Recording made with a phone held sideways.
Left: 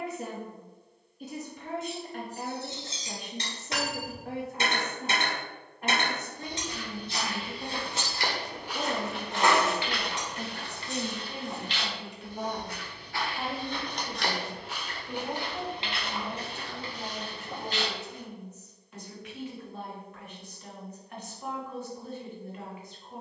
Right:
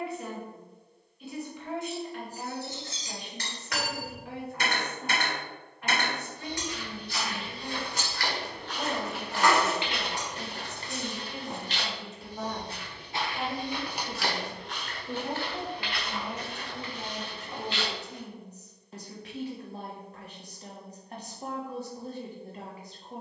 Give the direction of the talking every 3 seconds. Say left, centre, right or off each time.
left, left, left, left, centre, right, right, right.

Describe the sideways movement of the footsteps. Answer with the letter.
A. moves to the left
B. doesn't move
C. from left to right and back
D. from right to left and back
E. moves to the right
C.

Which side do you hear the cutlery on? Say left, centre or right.
left.